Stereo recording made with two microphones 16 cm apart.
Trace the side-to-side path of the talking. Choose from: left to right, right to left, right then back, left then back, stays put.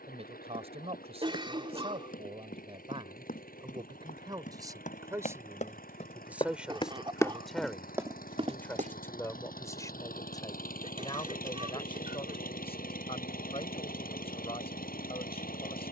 right to left.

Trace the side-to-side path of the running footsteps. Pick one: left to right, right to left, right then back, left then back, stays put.
left to right.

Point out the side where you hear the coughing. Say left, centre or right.
right.